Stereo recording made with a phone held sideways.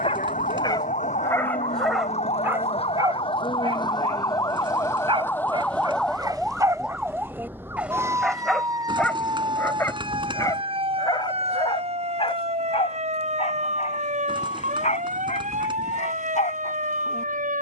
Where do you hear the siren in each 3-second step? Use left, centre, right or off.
left, left, centre, right, right, right.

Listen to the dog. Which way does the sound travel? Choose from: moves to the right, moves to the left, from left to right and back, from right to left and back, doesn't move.
from left to right and back.